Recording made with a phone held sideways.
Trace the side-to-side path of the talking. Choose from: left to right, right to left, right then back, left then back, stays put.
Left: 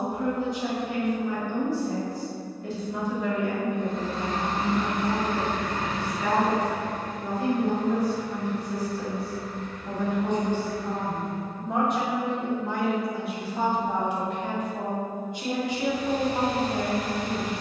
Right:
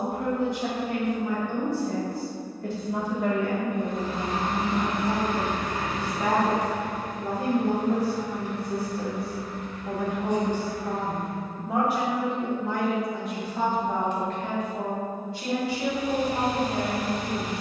right to left.